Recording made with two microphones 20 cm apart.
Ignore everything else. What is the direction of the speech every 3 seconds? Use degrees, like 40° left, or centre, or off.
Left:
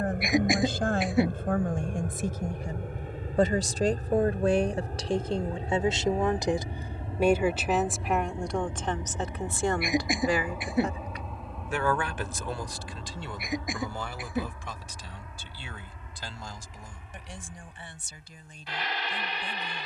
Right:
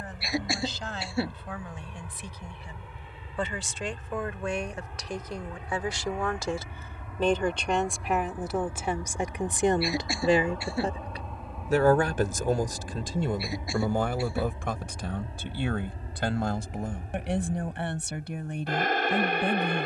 50° left, 30° left, 10° left, 30° right, 50° right, 60° right, 70° right.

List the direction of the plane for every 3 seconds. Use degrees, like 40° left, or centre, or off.
50° left, 40° left, 30° left, 10° left, 20° right, 40° right, 50° right.